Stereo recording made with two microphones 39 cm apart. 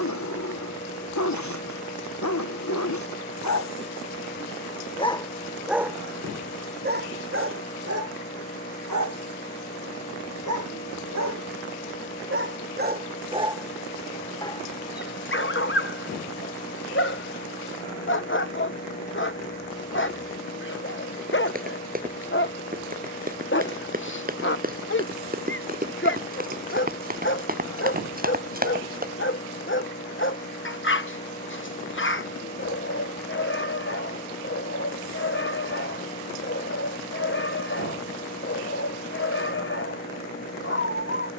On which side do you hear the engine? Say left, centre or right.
left.